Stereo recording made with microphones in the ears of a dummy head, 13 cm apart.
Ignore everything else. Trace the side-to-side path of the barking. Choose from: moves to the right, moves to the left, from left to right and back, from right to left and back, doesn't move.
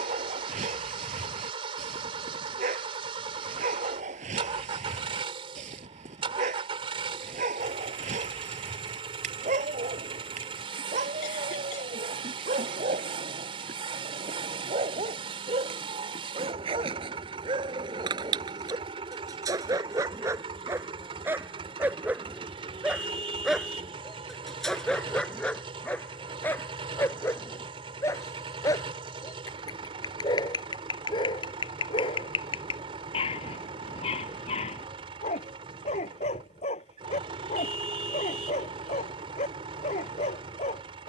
moves to the left.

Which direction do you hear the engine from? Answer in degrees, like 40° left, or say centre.
40° right.